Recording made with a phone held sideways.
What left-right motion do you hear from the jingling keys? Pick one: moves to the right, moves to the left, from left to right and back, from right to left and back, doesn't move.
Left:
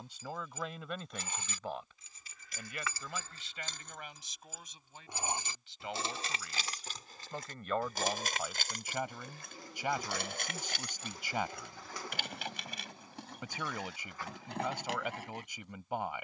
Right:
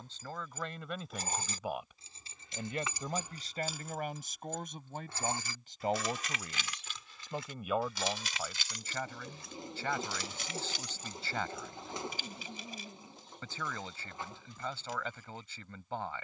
moves to the left.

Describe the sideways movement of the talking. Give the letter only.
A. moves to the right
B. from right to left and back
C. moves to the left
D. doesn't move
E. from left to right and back
E.